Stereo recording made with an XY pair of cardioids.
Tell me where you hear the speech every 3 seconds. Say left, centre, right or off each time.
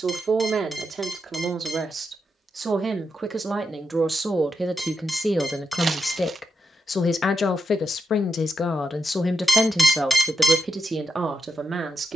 right, centre, left, centre.